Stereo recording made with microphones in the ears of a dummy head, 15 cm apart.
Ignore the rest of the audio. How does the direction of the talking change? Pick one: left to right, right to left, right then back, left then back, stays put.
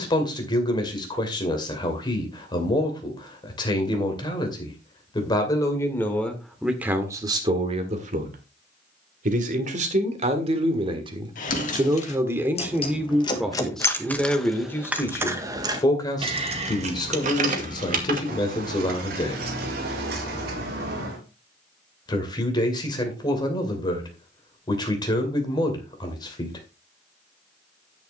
right then back.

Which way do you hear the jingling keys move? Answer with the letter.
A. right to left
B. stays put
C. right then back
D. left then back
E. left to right
E.